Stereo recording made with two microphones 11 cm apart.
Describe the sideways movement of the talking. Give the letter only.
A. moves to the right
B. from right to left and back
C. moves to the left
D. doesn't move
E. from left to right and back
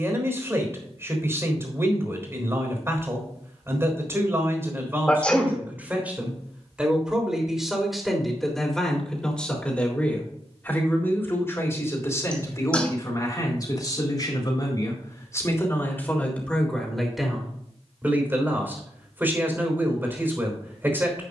B.